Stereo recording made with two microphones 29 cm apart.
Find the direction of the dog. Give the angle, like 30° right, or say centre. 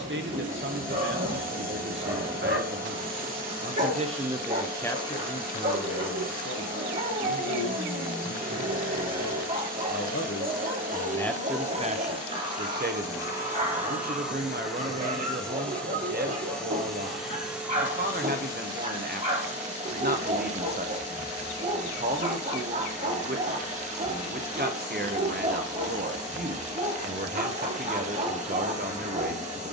30° right.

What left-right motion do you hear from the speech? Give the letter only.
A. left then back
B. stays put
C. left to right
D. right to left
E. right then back
A.